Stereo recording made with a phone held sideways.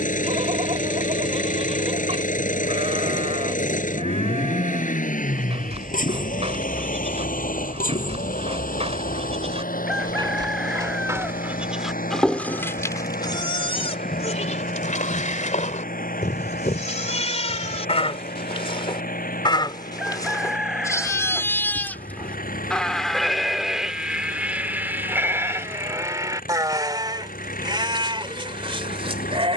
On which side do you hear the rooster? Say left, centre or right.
centre.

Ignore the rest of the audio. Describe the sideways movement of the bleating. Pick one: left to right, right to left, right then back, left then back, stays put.
left then back.